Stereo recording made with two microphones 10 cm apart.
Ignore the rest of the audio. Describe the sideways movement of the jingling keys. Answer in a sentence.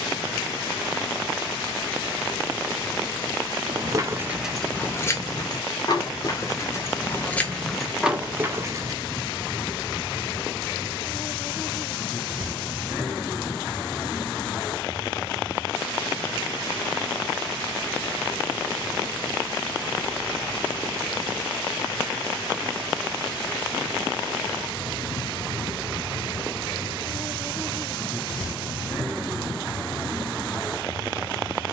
In this clip you hear the jingling keys go left and come back.